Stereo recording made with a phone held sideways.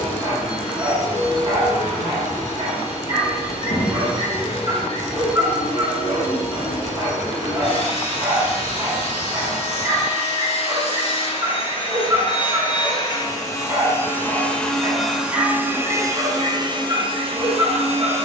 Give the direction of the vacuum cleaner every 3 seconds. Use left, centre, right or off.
left, left, left, left, left, right.